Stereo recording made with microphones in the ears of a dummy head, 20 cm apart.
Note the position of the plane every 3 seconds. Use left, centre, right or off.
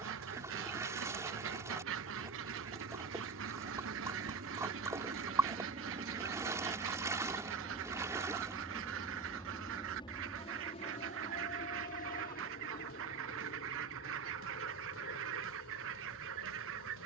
right, right, centre, left, left, left.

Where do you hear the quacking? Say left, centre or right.
right.